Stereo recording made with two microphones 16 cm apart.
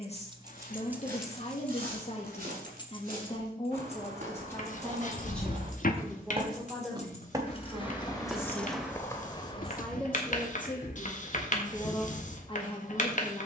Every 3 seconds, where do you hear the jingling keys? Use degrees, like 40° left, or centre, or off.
centre, 40° left, 30° left, off, off.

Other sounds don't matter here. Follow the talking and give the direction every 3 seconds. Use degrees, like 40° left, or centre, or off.
40° left, 20° left, centre, 10° left, 30° left.